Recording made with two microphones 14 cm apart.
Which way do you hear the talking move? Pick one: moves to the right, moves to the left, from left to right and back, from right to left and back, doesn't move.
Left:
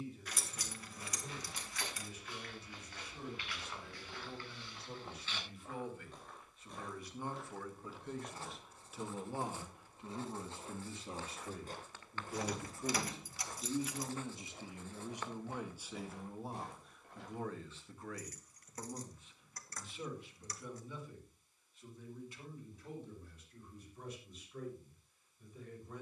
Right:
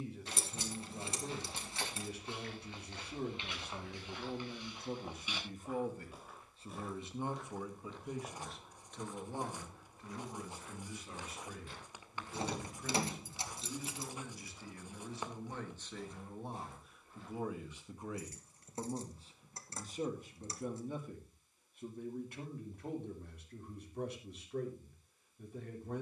from right to left and back.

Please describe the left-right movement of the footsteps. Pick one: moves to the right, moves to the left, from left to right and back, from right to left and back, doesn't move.
moves to the left.